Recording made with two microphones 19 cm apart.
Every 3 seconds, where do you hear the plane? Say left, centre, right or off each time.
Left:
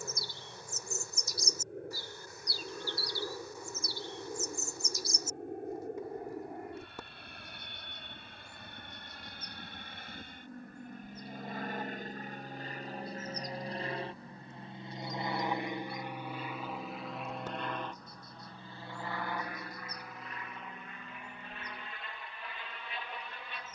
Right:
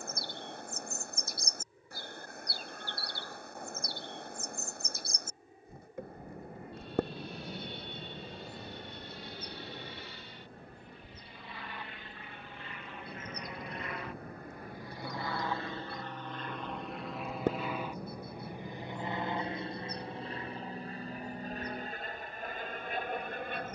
left, left, left, left, left, centre, right, right.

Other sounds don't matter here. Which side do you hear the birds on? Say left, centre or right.
right.